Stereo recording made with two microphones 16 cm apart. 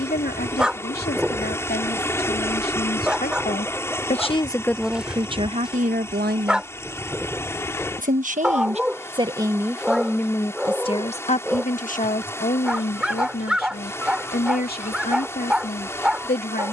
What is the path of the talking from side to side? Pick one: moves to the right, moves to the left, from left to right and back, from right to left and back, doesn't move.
from left to right and back.